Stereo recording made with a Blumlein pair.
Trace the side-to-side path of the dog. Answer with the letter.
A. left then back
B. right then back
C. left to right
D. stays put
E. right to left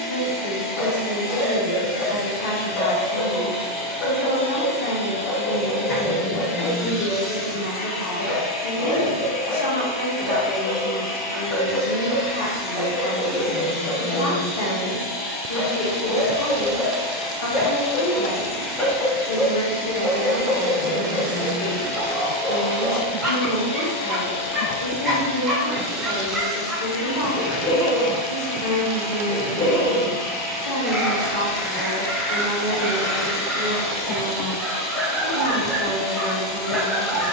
C.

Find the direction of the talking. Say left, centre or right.
left.